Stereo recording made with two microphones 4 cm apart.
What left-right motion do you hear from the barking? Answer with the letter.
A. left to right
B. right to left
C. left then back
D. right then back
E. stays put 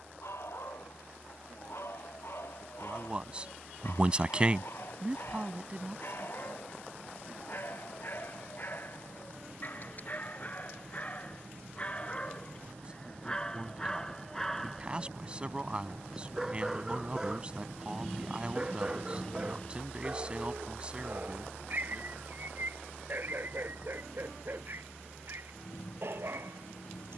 A.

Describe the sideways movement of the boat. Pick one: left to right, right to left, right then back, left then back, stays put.
right to left.